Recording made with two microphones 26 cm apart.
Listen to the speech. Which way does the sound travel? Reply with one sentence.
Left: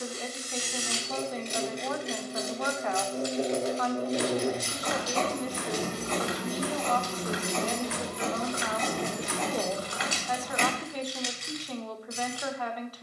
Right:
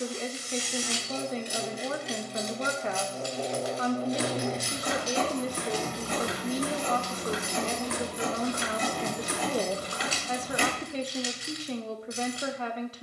In this clip you hear the speech stay put.